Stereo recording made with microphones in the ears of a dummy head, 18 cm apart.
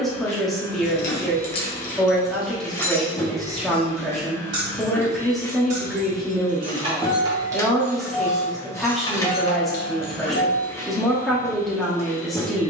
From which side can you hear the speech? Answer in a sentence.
In this clip you hear the speech in the centre.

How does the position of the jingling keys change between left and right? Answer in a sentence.
You can hear the jingling keys move from left to right and back again.